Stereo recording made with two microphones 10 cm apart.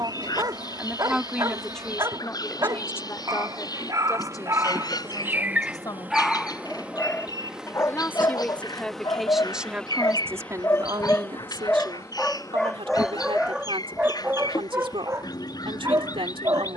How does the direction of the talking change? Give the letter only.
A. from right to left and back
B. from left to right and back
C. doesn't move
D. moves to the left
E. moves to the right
A.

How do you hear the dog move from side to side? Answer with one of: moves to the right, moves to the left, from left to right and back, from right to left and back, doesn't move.
from right to left and back.